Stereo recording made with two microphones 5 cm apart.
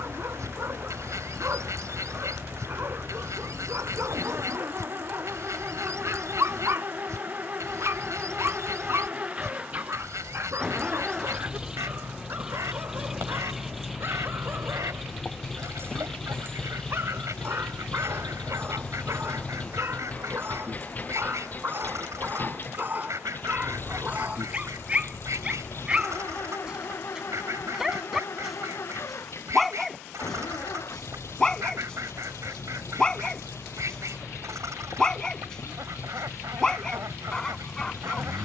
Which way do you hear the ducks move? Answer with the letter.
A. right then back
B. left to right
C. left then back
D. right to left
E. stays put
E.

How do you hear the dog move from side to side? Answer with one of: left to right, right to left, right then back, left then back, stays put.
right to left.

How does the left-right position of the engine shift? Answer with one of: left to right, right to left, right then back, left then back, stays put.
right to left.